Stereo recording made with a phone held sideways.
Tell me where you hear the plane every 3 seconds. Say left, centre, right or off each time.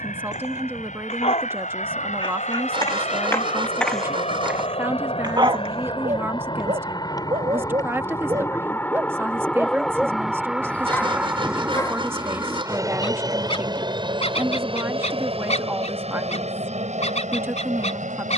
left, left, left, centre, right, right.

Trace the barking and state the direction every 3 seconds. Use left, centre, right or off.
left, centre, right, centre, left, left.